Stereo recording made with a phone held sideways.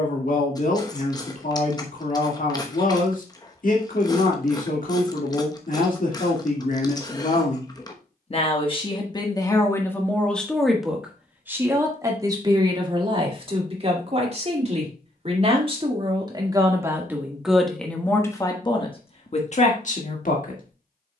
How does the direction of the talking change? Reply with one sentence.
You can hear the talking go right and come back.